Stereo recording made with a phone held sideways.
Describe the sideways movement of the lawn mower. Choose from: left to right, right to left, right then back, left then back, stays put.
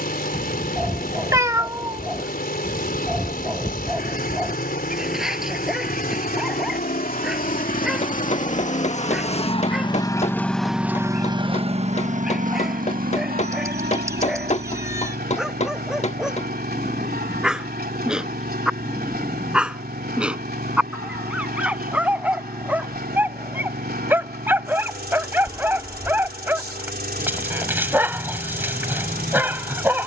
left to right.